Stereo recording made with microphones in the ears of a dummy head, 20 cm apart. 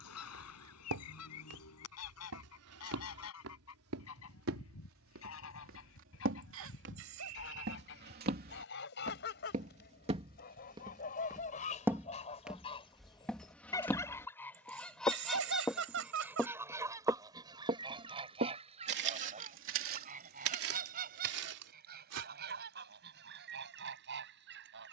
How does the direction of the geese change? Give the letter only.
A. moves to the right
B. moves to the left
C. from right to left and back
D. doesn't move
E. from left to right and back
A.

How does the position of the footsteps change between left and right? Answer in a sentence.
In this clip you hear the footsteps move from right to left and back again.